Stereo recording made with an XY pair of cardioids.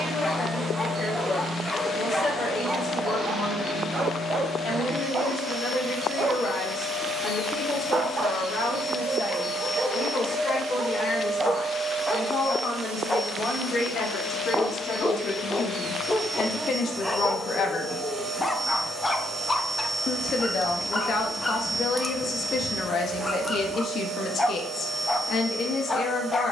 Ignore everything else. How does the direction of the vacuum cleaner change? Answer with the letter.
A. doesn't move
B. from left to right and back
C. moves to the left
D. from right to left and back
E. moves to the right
E.